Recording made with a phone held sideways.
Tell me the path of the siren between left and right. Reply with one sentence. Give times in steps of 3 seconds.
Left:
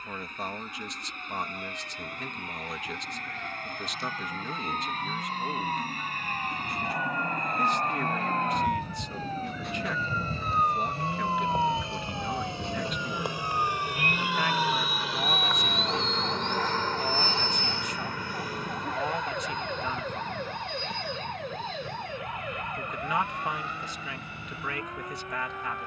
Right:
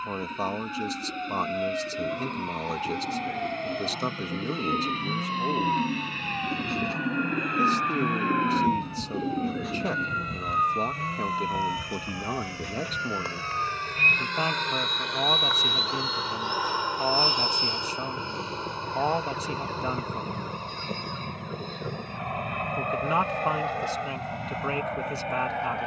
In this clip you hear the siren on the right from 0 s, in the centre from 9 s and on the left from 12 s.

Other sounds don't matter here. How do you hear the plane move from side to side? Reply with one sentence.
In this clip you hear the plane go from the left side to the right.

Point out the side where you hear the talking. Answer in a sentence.
In this clip you hear the talking on the right.